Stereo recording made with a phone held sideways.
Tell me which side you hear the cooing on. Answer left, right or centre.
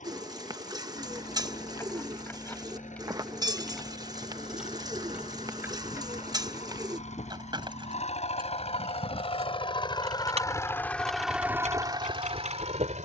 right.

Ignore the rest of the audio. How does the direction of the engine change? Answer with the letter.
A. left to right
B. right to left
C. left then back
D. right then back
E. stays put
A.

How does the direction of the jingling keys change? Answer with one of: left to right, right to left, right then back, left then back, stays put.
left to right.